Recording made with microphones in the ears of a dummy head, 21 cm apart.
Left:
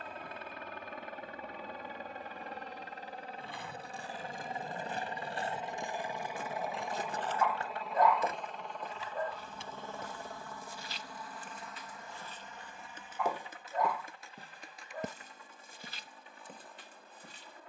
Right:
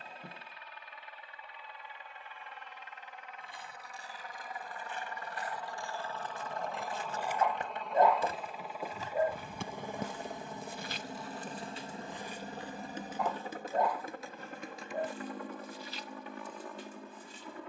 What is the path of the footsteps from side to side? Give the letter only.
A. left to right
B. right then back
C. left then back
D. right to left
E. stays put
B.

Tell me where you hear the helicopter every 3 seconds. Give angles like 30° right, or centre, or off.
40° left, 20° left, centre, 20° right, 40° right, 50° right.